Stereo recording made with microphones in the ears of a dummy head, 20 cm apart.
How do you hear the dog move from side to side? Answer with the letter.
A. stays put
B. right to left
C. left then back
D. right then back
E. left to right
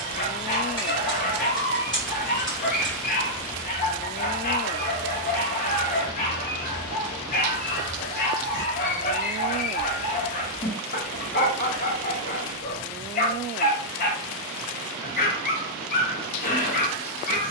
A.